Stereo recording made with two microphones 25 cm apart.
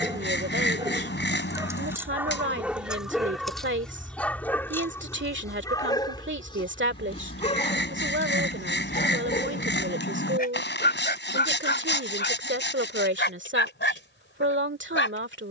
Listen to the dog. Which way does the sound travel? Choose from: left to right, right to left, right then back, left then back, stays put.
right to left.